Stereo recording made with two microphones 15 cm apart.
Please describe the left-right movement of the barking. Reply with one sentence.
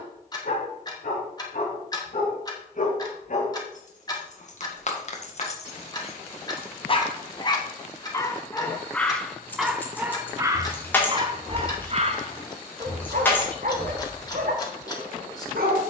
In this clip you hear the barking travel towards the right.